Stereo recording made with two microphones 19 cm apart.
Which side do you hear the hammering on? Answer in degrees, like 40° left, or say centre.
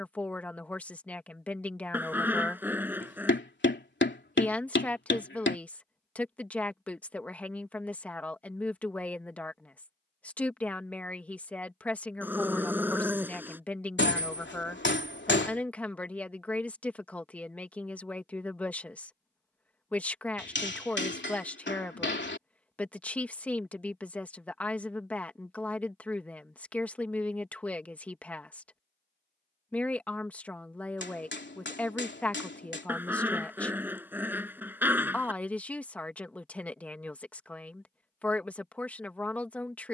70° left.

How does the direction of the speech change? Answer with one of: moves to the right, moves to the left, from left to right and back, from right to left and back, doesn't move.
doesn't move.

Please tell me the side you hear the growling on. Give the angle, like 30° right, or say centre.
10° right.